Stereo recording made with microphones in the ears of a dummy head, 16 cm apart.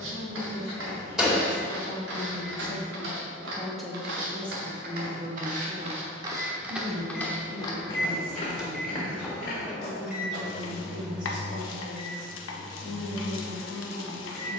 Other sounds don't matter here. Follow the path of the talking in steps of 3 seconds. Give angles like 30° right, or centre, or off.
40° left, 10° right, 50° right, 60° right, 70° right.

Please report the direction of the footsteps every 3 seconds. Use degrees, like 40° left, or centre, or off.
80° right, 60° right, 10° left, 50° left, off.